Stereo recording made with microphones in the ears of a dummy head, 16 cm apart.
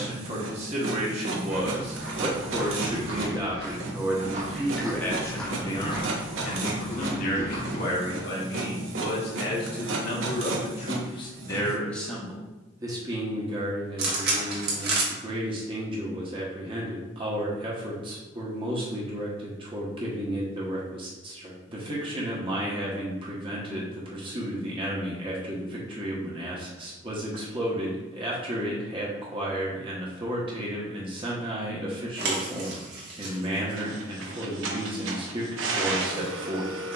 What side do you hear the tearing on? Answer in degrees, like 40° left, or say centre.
60° right.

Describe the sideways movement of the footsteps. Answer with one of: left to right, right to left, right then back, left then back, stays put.
right to left.